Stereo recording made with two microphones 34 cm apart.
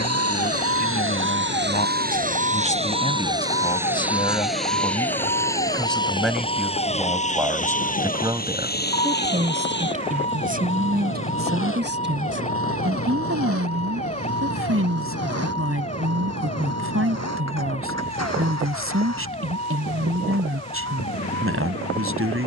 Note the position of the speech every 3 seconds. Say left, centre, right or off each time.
left, centre, centre, right, right, right, right, right.